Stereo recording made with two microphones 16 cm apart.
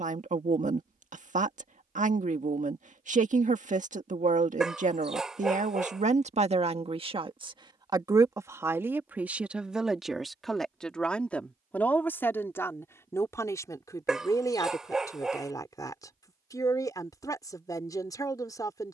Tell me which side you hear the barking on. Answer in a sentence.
You can hear the barking in the centre.